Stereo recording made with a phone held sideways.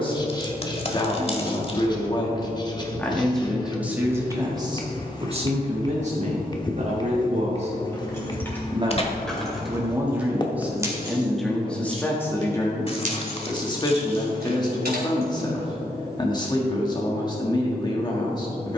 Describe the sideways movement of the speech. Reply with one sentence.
You can hear the speech move from left to right and back again.